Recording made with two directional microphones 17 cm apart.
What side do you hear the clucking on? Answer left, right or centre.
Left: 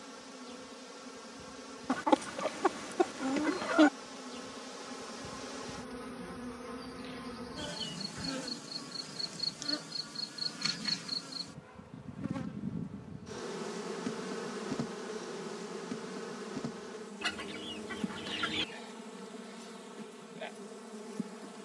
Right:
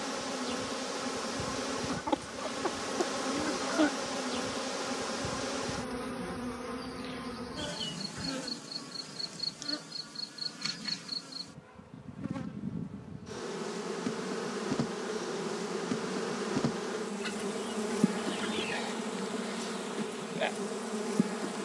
left.